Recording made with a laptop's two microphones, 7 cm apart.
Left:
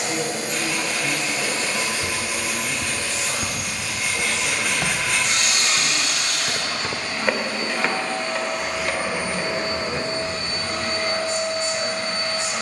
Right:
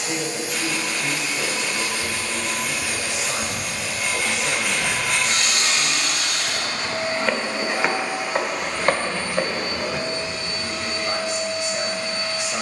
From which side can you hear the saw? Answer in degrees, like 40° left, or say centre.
centre.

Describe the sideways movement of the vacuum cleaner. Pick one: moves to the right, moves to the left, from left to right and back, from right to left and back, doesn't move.
from left to right and back.